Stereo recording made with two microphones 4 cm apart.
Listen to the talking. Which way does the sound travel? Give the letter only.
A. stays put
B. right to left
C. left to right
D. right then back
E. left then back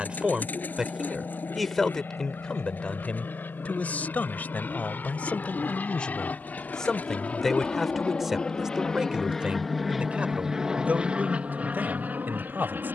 E.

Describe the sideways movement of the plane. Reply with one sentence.
You can hear the plane go from the left side to the right.